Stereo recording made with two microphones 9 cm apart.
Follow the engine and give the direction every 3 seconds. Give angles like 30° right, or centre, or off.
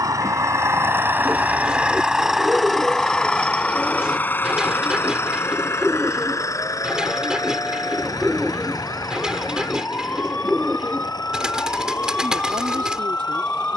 20° right, 20° left, 40° left, 50° left, 60° left.